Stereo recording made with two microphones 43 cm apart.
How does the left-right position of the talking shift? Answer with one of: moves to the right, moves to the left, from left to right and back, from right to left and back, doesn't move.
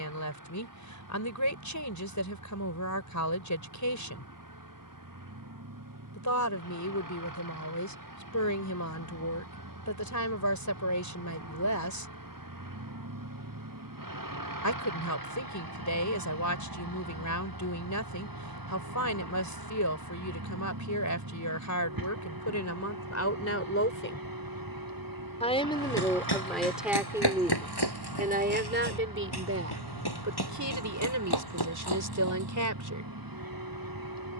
moves to the right.